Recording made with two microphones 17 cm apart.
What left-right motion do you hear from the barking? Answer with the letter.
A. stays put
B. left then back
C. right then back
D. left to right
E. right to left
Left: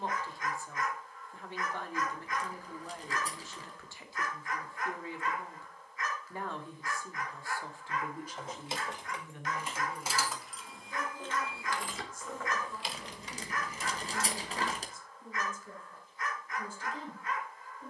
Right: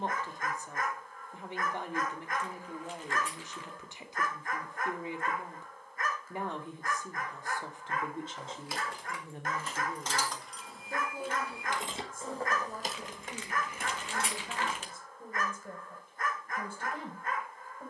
A.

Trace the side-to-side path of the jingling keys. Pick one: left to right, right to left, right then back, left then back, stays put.
left to right.